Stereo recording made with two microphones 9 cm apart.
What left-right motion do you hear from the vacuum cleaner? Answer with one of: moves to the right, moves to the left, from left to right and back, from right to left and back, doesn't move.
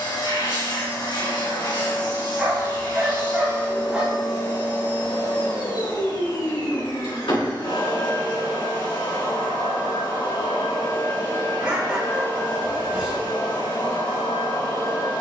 doesn't move.